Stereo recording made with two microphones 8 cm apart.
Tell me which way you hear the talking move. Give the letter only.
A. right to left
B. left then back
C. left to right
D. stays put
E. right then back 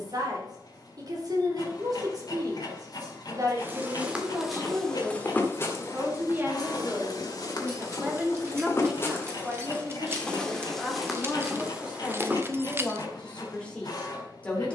A.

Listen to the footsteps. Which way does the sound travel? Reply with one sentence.
In this clip you hear the footsteps go left and come back.